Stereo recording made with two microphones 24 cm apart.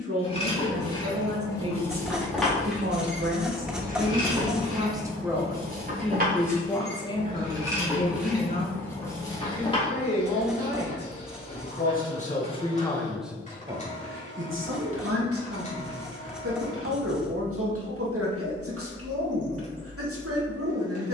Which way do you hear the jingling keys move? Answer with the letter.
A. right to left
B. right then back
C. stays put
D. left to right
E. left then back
B.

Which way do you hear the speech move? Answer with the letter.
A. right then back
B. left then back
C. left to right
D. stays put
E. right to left
B.